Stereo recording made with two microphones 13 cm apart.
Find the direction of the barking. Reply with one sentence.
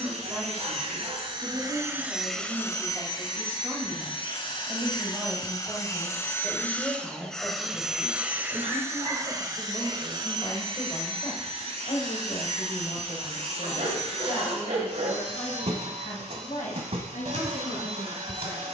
You can hear the barking on the right.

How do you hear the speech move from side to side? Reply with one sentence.
In this clip you hear the speech move from right to left.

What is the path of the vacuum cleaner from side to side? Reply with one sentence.
You can hear the vacuum cleaner go left and come back.